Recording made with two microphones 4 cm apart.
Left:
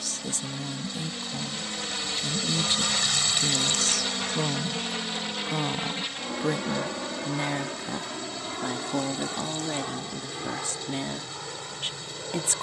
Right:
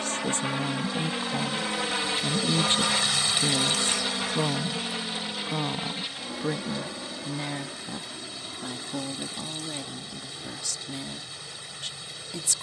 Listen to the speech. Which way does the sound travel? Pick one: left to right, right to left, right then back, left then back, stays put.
right to left.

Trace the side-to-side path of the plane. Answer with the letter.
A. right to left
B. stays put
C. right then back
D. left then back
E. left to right
A.